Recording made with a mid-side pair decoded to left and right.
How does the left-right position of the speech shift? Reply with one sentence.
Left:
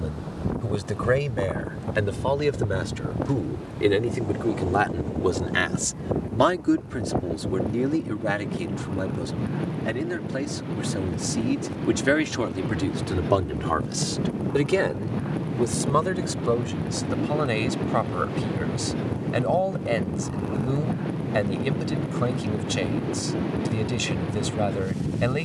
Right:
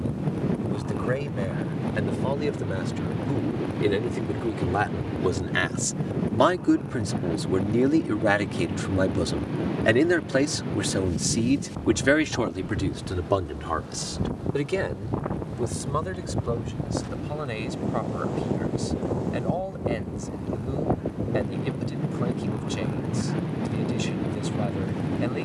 You can hear the speech go right and come back.